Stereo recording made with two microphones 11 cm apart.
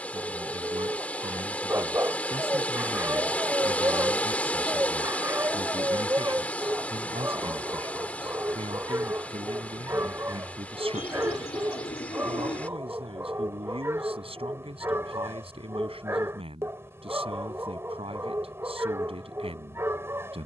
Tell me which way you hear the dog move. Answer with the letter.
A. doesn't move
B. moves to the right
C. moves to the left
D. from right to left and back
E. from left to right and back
A.